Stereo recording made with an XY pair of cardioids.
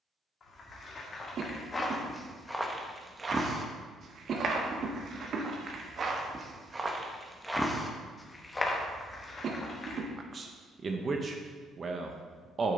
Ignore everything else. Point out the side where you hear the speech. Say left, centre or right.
right.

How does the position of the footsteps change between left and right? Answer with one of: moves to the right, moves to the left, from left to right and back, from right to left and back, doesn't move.
from left to right and back.